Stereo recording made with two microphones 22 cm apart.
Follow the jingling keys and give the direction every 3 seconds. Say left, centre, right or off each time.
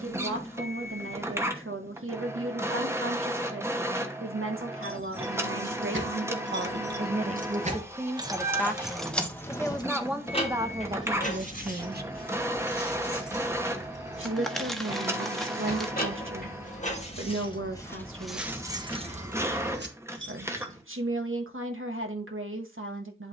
off, right, right, left, left, left, right, off.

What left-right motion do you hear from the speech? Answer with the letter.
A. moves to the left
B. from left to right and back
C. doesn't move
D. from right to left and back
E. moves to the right
D.